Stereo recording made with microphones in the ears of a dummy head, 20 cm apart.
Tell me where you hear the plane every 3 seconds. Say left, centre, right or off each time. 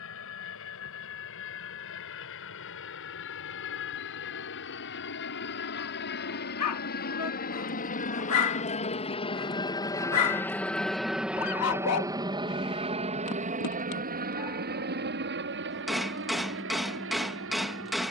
left, left, left, centre, right, right.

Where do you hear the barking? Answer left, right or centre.
left.